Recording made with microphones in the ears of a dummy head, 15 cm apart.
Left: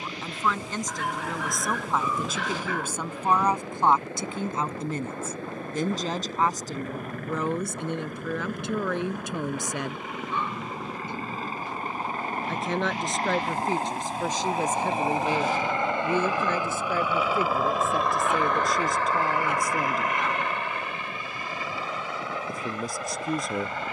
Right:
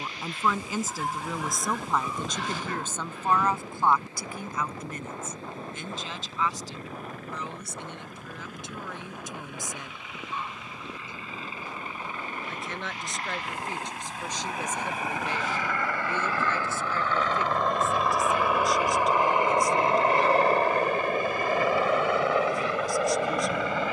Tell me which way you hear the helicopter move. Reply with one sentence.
In this clip you hear the helicopter move to the right.